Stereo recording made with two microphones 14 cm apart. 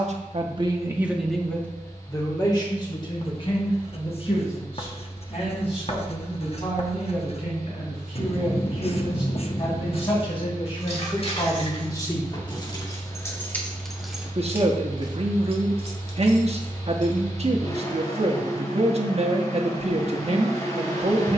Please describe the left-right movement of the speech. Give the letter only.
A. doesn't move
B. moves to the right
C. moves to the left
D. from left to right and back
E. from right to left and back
E.